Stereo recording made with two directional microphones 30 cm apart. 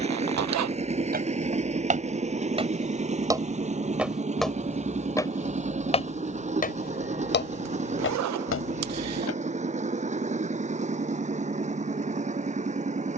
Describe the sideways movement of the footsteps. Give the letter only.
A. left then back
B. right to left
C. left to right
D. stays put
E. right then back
B.